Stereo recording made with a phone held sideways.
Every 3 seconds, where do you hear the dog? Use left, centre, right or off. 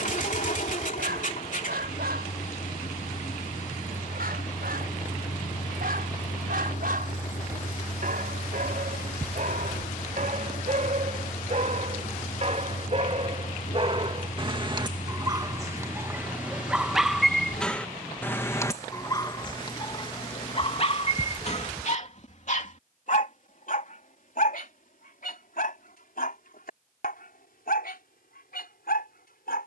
right, right, right, right, right, centre, left, left, left, left.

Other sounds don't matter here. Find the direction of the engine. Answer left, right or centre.
left.